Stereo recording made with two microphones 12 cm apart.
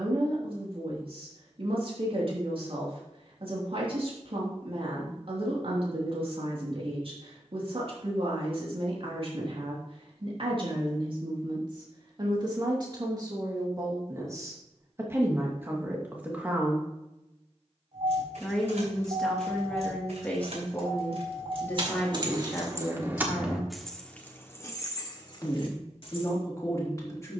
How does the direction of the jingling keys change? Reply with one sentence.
In this clip you hear the jingling keys go from the right side to the left.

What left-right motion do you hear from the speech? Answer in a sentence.
You can hear the speech travel towards the left.